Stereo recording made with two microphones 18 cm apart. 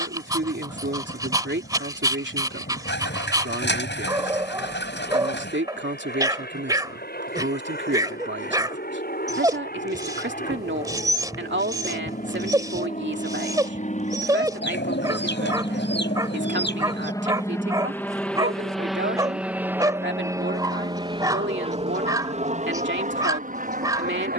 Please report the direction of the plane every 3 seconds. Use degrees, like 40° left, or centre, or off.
70° left, 70° left, 60° left, 60° left, 40° left, 20° left, 10° right, 40° right.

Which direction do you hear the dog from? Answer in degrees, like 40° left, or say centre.
20° right.